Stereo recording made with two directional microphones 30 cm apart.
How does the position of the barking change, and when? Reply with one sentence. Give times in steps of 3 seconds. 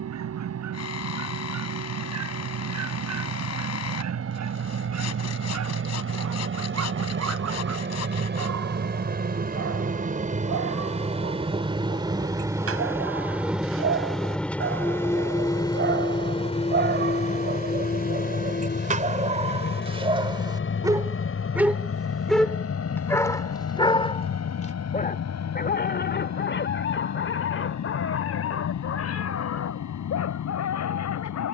You can hear the barking on the right from 0 s, in the centre from 21 s and on the left from 24 s.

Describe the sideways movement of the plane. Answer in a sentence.
In this clip you hear the plane go from the right side to the left.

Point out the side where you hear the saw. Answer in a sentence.
In this clip you hear the saw on the left.